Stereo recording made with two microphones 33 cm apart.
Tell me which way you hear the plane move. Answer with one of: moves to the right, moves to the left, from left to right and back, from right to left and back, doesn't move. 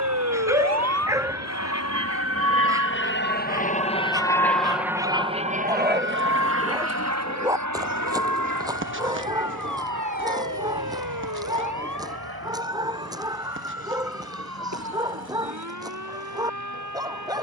moves to the right.